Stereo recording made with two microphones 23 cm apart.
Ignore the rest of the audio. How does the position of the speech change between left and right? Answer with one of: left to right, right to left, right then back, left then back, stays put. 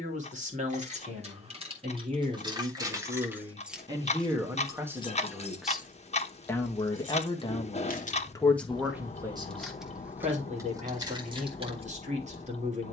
left then back.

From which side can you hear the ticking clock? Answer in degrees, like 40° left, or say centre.
30° left.